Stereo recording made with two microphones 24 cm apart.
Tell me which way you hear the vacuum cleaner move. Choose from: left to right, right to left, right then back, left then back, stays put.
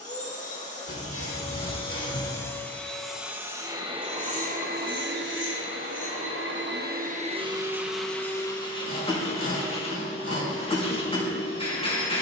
right then back.